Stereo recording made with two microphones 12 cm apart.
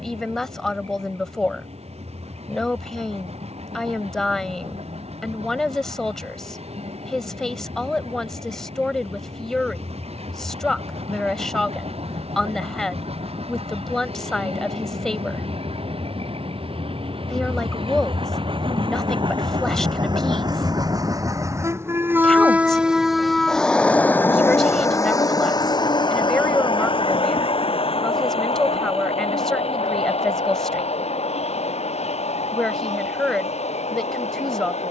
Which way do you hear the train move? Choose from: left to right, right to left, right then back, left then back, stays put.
right to left.